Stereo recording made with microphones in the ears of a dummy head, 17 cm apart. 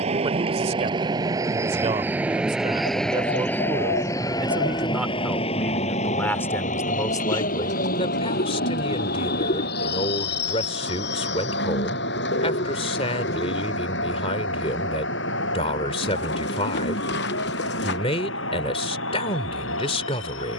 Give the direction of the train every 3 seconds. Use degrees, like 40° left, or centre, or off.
20° right, 20° left, 50° left, 60° left, 70° left, 70° left, 70° left.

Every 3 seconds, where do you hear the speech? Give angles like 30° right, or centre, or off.
30° right, 10° right, 20° left, 30° left, 30° left, 30° left, 30° left.